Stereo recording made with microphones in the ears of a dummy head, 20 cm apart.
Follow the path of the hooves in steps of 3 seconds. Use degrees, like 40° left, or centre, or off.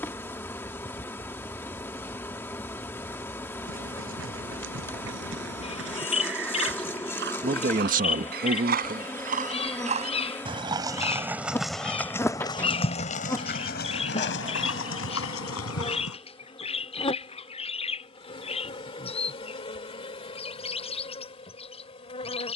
off, 60° right, 50° right, 20° right, 40° left, 70° left, off, off.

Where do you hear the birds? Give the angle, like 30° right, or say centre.
30° left.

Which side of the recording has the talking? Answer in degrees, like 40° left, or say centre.
40° right.